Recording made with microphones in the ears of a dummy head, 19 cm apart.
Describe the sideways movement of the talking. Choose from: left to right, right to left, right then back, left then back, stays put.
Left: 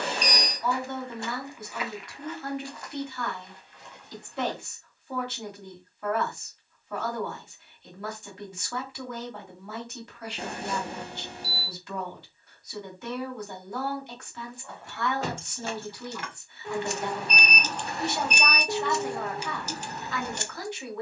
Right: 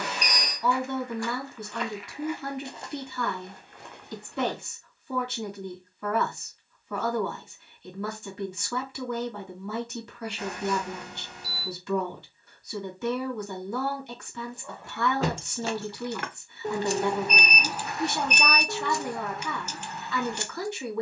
stays put.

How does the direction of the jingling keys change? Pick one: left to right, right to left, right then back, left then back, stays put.
right to left.